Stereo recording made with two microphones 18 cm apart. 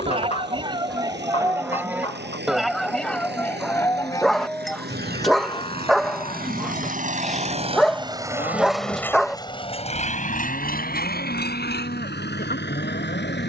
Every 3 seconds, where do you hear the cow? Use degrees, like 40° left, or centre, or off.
20° right, 20° left, 40° left, 60° left, 60° left.